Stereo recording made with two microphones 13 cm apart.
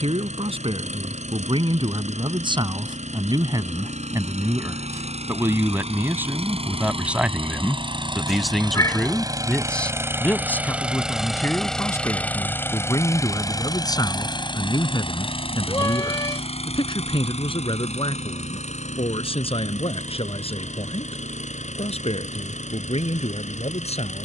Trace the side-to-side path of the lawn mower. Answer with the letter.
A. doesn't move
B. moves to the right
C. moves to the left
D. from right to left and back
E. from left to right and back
C.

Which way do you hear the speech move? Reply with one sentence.
In this clip you hear the speech go from the right side to the left.